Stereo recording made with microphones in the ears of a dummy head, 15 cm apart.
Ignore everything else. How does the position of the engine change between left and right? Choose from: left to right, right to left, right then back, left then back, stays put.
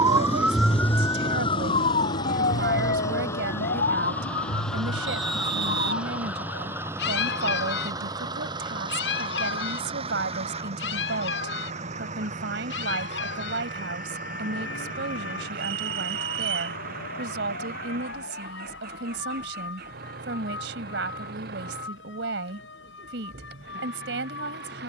left to right.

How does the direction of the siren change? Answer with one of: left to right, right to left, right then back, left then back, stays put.
right to left.